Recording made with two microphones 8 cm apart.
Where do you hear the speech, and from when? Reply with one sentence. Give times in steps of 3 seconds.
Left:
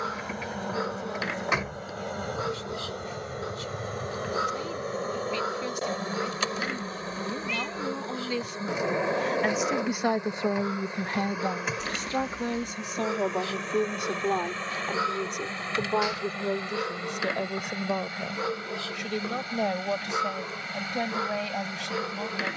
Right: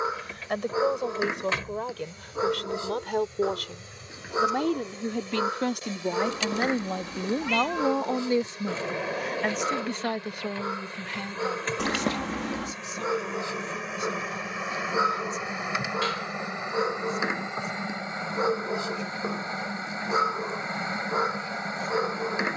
In this clip you hear the speech on the right from 0 s and on the left from 9 s.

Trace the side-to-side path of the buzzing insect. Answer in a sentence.
You can hear the buzzing insect move from left to right.